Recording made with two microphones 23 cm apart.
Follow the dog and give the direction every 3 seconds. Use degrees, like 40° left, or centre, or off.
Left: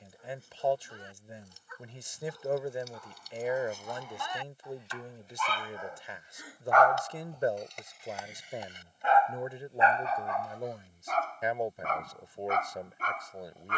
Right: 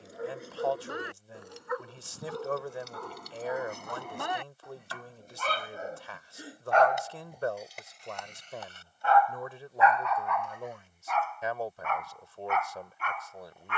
80° right, 60° right, 10° right, 30° left, 40° left.